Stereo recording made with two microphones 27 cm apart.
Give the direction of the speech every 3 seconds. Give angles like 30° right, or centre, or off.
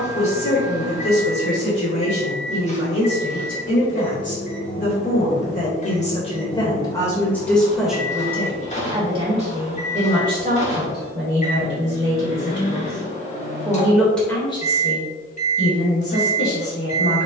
60° left, 40° left, 10° left, 30° right, 20° right, 50° left.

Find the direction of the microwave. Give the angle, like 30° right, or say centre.
30° left.